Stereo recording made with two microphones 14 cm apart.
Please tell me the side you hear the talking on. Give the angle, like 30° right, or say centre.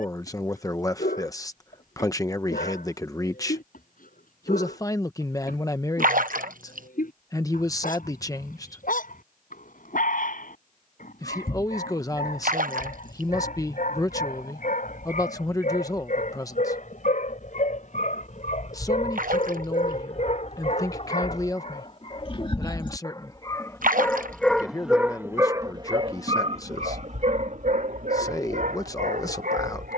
20° left.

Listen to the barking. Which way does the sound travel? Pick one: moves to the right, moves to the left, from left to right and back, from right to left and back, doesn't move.
moves to the right.